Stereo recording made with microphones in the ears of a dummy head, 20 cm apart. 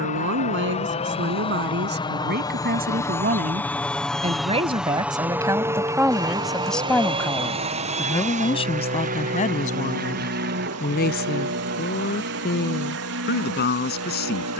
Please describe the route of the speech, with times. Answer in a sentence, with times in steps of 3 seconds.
In this clip you hear the speech on the right from 0 s, in the centre from 6 s and on the left from 9 s.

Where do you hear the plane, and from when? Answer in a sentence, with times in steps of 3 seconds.
In this clip you hear the plane on the left from 0 s, in the centre from 3 s and on the right from 6 s.